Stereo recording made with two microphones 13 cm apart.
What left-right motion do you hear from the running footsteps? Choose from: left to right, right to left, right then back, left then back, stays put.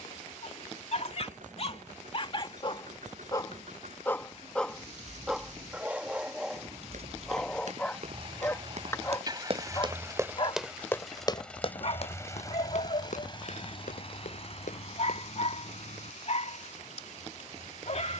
right to left.